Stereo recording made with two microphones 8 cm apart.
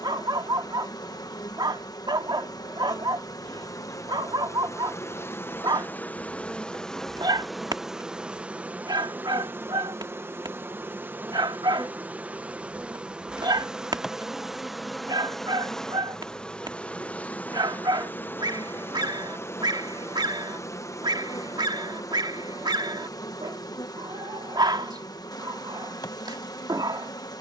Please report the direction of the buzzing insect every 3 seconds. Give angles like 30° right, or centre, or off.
60° left, 40° left, centre, 30° right, 10° right, 10° left, 30° left, 50° left, 60° left.